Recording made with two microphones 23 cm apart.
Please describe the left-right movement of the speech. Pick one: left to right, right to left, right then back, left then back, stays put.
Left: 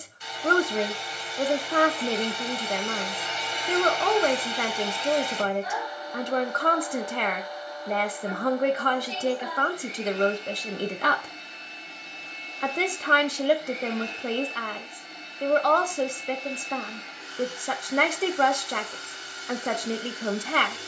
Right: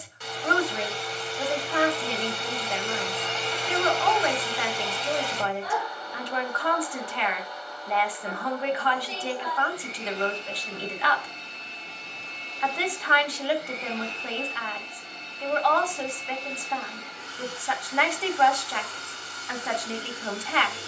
stays put.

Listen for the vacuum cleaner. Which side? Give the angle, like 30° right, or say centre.
80° right.